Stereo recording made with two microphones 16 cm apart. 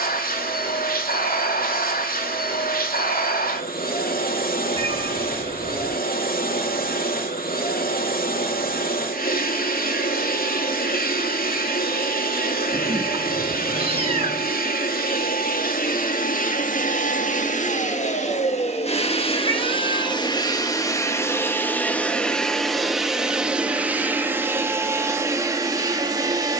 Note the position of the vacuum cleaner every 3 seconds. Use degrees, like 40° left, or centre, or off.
70° left, 70° left, 70° left, 70° left, 70° left, 60° left, 40° left, centre, 20° right.